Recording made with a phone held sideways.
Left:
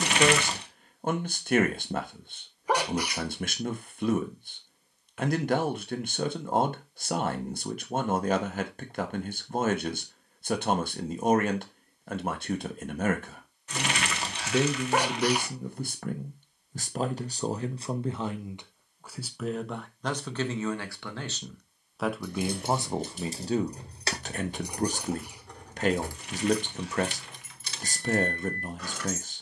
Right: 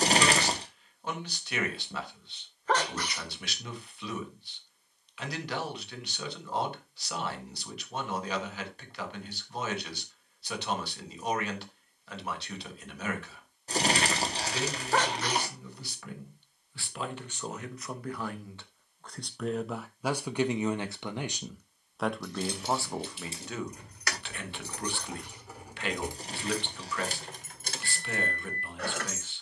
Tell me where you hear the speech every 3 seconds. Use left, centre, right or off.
left, left, left, left, left, left, centre, centre, left, left.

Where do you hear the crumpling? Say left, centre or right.
right.